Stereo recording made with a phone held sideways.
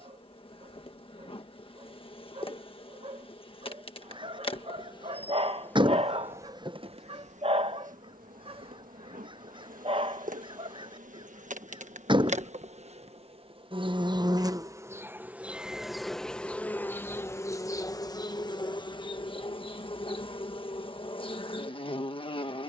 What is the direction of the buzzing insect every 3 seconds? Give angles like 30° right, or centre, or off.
40° left, 30° left, 50° right, 70° right, 40° right, 10° left, 30° left, 40° left.